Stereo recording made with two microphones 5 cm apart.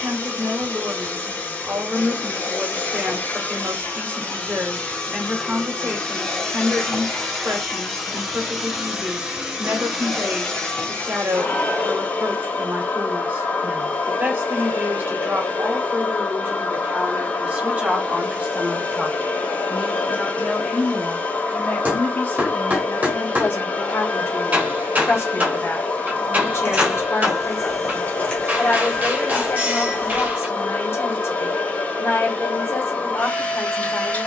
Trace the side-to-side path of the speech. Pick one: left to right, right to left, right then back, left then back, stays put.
right to left.